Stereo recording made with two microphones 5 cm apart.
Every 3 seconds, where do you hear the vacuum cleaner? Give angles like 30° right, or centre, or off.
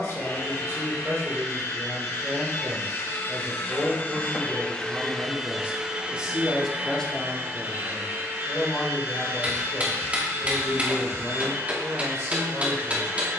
60° left, 20° left, 40° right, 50° right, 50° right.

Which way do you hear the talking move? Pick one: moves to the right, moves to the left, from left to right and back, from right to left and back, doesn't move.
from right to left and back.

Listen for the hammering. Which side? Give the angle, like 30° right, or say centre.
30° right.